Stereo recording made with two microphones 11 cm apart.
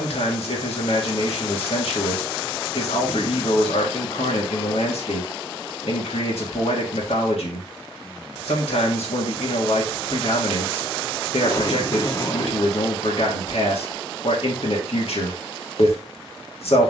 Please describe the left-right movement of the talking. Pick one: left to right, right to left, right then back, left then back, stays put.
stays put.